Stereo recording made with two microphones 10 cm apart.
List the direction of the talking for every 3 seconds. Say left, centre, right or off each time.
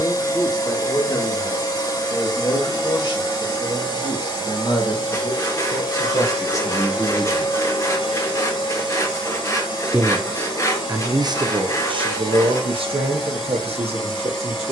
left, left, left, right, right.